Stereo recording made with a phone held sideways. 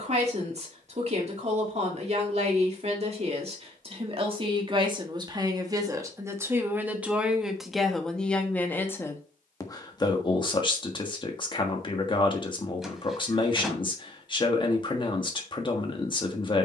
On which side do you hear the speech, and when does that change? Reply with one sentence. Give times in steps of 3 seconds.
You can hear the speech on the right from 0 s, in the centre from 6 s and on the left from 9 s.